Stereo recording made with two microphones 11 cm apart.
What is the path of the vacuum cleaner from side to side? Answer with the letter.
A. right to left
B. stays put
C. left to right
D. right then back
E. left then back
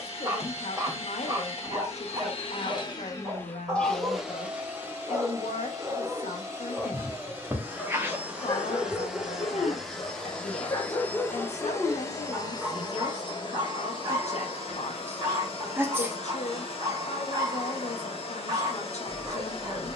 D.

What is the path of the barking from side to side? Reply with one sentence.
In this clip you hear the barking move from right to left and back again.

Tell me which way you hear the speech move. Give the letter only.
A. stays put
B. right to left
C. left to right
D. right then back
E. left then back
A.